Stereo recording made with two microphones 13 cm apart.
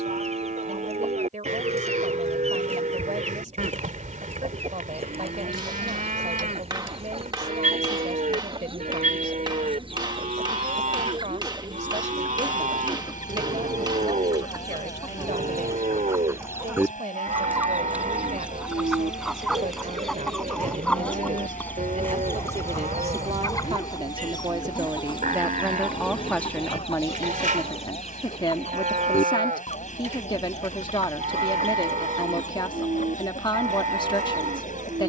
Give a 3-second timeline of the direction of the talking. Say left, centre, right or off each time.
right, right, right, right, right, right, right, right, centre, left, left, left.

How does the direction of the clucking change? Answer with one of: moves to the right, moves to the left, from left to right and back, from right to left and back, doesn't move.
moves to the left.